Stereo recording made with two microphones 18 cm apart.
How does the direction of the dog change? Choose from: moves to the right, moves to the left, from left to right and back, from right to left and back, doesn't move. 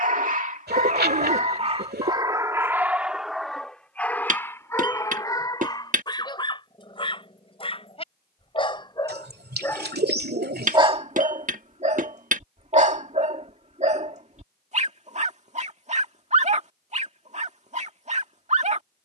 from right to left and back.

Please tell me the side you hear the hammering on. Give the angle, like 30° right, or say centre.
50° right.